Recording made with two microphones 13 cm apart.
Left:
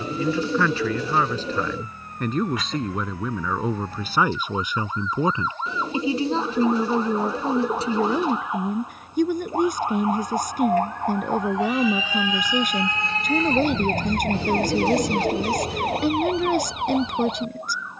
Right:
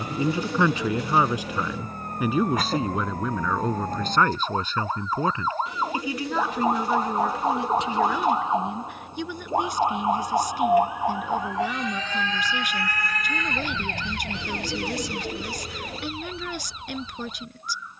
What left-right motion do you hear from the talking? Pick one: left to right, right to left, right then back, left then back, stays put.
right to left.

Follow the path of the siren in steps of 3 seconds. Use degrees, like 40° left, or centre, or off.
50° right, 50° right, 40° right, 10° right, 30° left, 70° left.